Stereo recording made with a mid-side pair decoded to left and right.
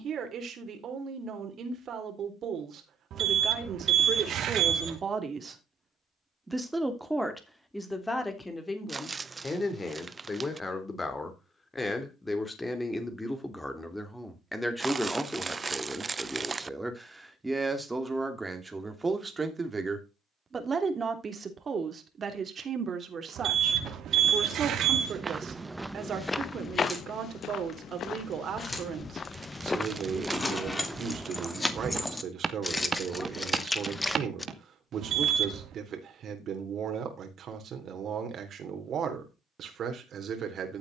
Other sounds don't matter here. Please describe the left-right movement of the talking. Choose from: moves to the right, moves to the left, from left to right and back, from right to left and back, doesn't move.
from right to left and back.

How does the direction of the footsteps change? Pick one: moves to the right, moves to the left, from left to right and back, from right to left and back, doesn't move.
from right to left and back.